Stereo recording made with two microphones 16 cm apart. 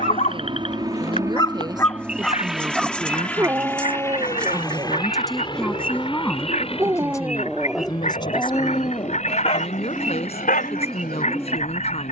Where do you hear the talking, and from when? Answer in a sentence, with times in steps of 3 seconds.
In this clip you hear the talking on the right from 0 s, in the centre from 3 s and on the left from 6 s.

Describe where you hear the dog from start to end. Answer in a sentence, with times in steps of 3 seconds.
You can hear the dog on the left from 0 s, on the right from 3 s, in the centre from 6 s and on the left from 9 s.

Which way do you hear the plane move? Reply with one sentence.
In this clip you hear the plane travel towards the left.